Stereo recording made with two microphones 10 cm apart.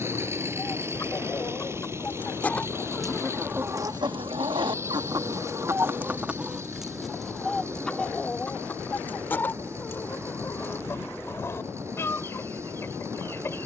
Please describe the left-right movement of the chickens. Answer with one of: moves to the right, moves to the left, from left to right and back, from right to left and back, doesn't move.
from left to right and back.